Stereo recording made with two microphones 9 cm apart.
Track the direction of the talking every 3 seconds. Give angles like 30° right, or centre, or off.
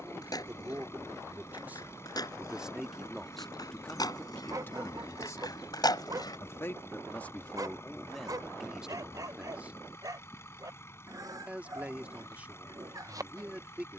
20° right, 20° left, 10° left, 20° right, 20° right.